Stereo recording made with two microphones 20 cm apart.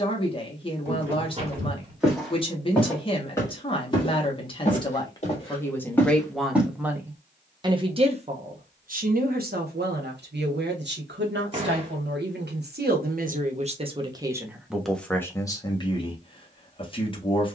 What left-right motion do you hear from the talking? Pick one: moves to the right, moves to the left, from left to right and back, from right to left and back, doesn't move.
from left to right and back.